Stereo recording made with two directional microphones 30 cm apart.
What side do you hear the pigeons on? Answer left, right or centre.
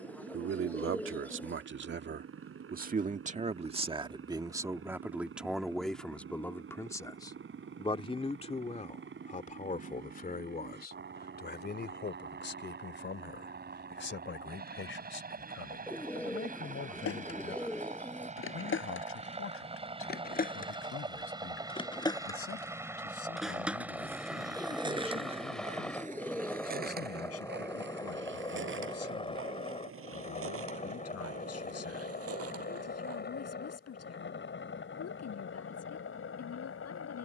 centre.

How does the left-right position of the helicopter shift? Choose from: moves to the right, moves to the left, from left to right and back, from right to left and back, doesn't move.
moves to the left.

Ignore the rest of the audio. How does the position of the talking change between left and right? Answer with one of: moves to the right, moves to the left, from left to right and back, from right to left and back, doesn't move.
moves to the left.